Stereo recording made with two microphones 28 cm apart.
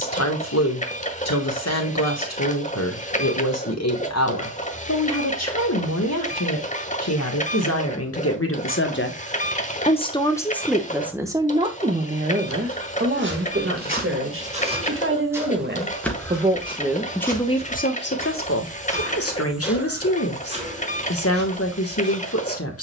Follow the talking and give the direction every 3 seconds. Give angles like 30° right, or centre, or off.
60° left, 60° left, 60° left, centre, 40° right, 10° right, 50° left, 50° left.